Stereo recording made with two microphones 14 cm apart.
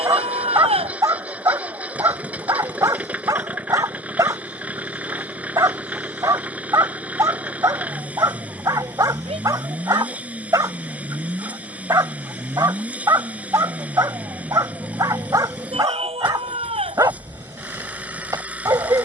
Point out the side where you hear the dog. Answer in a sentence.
In this clip you hear the dog on the right.